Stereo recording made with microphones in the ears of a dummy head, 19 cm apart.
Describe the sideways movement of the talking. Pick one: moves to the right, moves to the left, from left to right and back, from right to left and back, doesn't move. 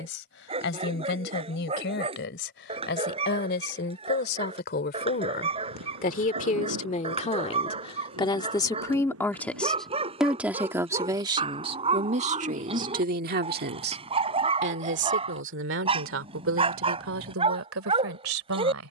moves to the right.